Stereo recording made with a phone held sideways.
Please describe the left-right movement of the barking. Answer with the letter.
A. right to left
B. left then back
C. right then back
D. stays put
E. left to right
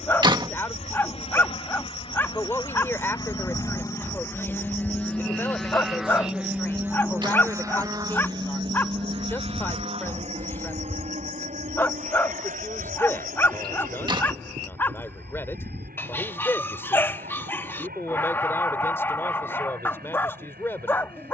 D.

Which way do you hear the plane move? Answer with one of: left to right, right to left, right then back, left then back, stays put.
left to right.